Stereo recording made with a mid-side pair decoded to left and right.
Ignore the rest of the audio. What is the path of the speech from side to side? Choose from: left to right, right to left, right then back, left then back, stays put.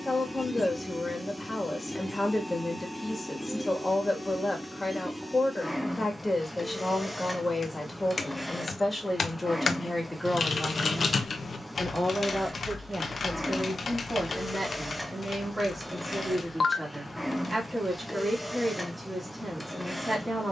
left to right.